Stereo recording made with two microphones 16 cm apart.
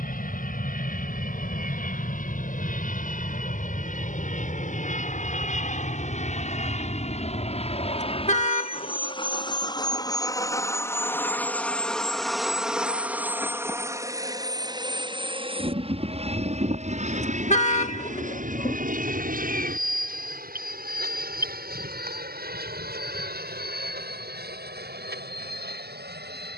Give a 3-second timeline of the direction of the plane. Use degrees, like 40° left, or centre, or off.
60° left, 60° left, 40° left, 20° left, 10° right, 40° right, 60° right, 60° right, 70° right.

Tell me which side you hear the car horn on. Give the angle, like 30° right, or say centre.
50° left.